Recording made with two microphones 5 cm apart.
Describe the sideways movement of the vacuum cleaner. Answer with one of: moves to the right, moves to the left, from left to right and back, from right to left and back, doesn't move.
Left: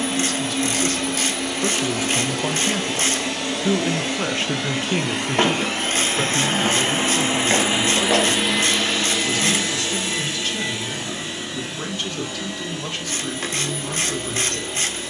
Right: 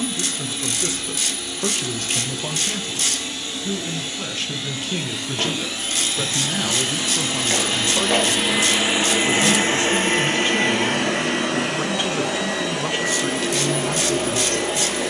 moves to the right.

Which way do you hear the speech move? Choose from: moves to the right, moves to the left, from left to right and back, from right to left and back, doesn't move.
from right to left and back.